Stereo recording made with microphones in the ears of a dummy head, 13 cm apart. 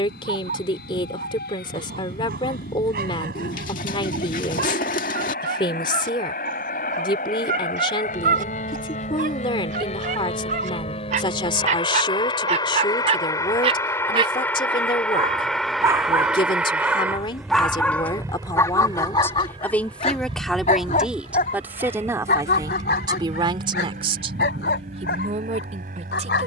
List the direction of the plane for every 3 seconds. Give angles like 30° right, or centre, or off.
70° left, 70° left, 60° left, 40° left, 20° left, centre, 30° right, 40° right, 50° right.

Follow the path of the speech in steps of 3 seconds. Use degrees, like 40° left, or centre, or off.
30° left, 30° left, 30° left, 30° left, 30° left, 30° left, 10° left, 20° right, 50° right.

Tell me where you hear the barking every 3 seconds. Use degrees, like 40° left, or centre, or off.
60° right, 60° right, 60° right, 50° right, 40° right, 10° right, 30° left, 60° left, 80° left.